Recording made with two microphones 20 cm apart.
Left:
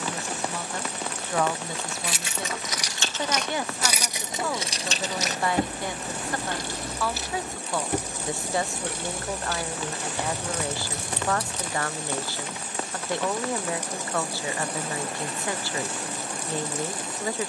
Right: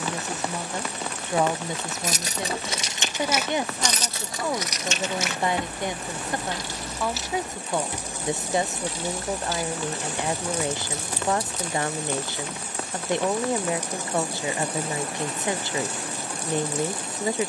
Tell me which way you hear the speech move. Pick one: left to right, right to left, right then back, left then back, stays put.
stays put.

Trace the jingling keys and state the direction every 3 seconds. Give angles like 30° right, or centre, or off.
30° right, 20° left, 60° left, 70° left, off, off.